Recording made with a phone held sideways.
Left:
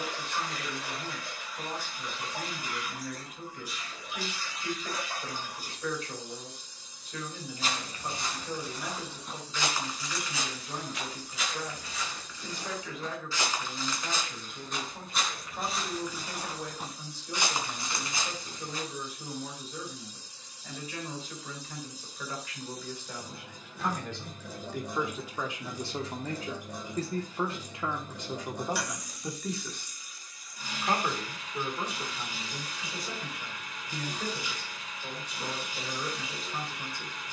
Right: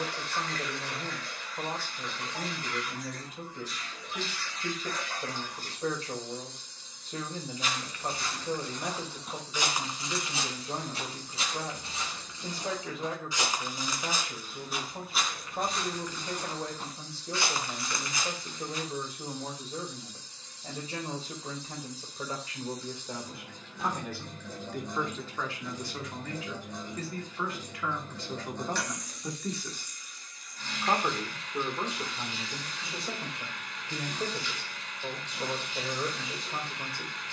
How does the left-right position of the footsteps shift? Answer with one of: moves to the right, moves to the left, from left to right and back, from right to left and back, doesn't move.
from left to right and back.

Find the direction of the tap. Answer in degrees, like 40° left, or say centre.
10° left.